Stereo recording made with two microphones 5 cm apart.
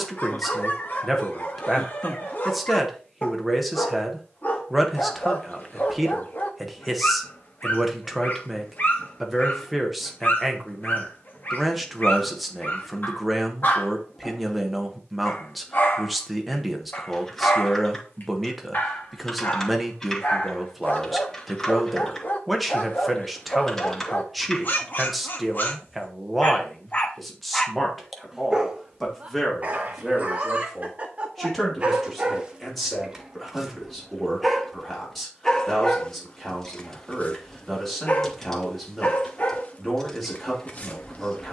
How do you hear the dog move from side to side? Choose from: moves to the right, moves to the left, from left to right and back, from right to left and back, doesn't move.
from left to right and back.